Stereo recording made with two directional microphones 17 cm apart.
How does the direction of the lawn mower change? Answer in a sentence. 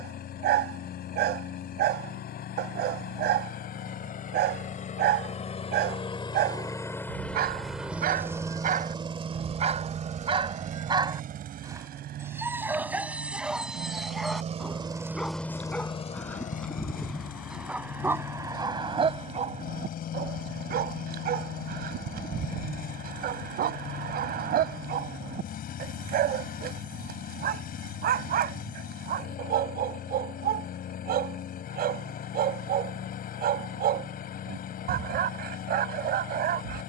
You can hear the lawn mower move from left to right and back again.